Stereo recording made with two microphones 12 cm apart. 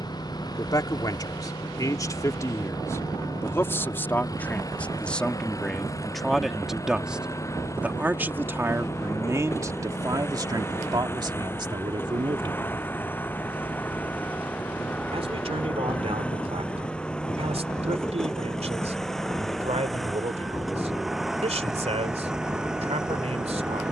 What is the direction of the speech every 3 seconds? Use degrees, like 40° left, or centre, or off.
30° left, 10° left, 10° right, 30° right, 40° right, 60° right, 60° right, 60° right.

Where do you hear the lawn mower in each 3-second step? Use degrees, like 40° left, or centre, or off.
30° left, 30° left, 20° left, 20° left, 10° left, 10° left, centre, 10° right.